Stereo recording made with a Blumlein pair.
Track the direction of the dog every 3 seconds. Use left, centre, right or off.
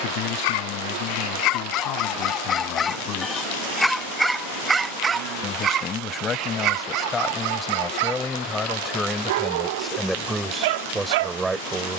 left, centre, right, right.